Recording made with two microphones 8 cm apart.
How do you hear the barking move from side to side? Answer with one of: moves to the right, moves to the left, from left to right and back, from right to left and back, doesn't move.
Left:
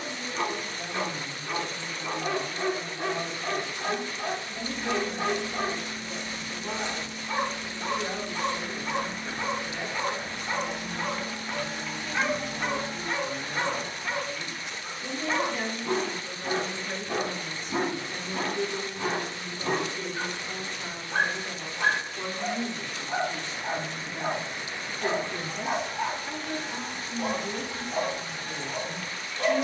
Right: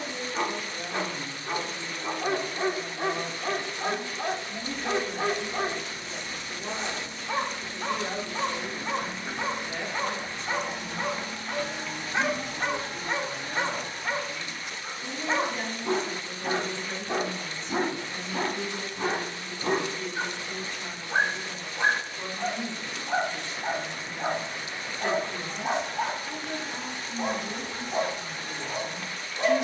doesn't move.